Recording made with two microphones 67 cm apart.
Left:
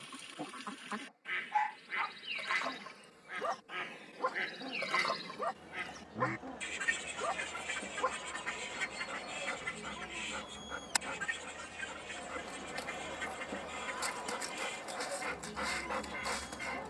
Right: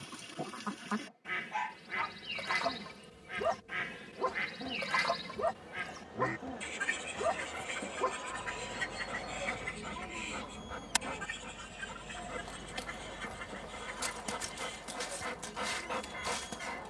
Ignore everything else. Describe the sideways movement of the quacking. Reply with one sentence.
In this clip you hear the quacking move from right to left.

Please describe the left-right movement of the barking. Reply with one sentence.
In this clip you hear the barking stay in one place.